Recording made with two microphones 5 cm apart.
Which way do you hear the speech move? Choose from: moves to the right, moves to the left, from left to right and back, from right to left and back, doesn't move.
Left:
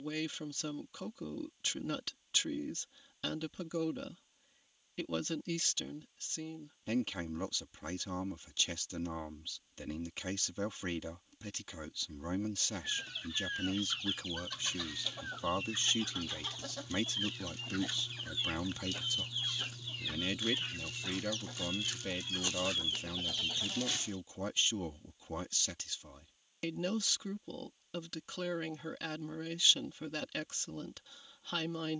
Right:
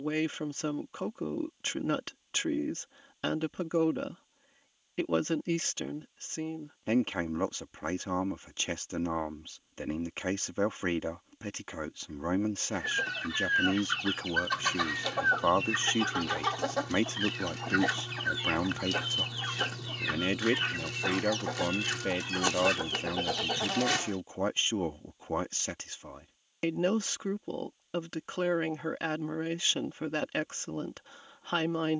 doesn't move.